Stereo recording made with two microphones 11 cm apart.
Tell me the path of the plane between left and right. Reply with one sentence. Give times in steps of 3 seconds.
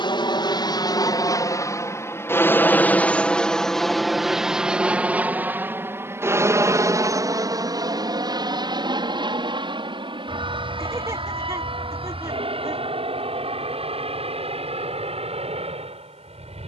You can hear the plane on the left from 0 s, in the centre from 3 s and on the right from 6 s.